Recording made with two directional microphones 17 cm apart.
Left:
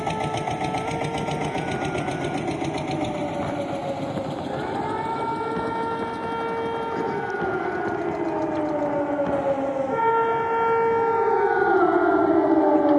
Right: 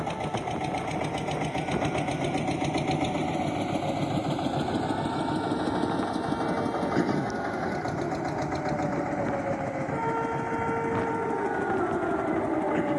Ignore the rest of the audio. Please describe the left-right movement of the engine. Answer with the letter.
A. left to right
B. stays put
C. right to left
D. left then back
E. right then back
A.